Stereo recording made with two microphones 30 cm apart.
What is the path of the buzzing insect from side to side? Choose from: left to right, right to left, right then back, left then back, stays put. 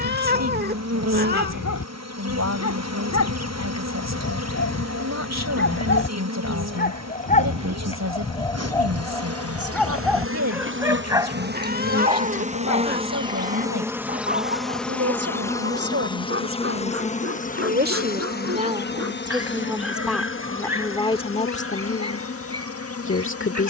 right to left.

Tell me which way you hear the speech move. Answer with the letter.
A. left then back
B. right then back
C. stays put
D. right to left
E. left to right
D.